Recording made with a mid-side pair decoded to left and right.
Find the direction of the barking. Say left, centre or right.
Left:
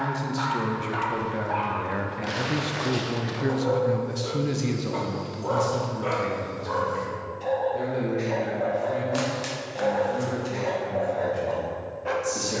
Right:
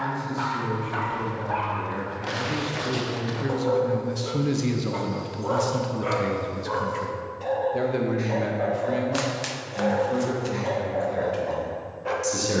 centre.